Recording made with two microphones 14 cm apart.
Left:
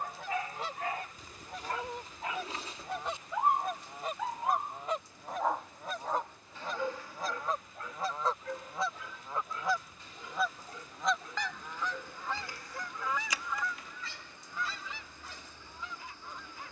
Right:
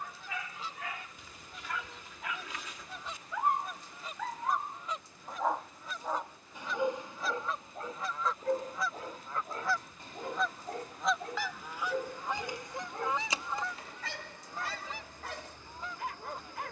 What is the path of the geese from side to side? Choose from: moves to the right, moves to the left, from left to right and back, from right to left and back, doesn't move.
moves to the right.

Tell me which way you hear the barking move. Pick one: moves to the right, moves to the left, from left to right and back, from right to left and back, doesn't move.
moves to the right.